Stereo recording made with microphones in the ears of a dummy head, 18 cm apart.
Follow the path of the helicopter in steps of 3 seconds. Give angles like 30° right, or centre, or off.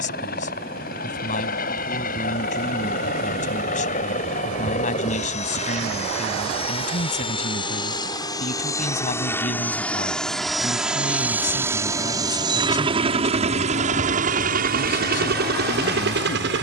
50° left, 40° left, 30° left, centre, 30° right, 50° right.